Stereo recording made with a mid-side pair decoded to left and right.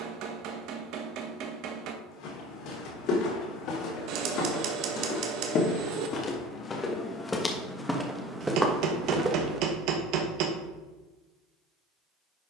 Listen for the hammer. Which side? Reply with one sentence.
In this clip you hear the hammer on the right.